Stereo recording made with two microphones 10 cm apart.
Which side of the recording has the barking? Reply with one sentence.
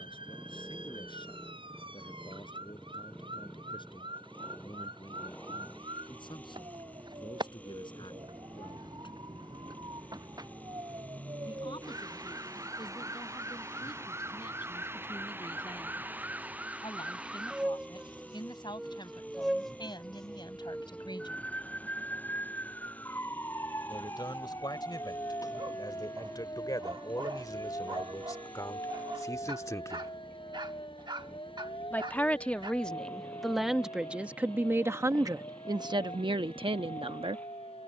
You can hear the barking on the right.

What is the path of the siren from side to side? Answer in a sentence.
In this clip you hear the siren travel towards the left.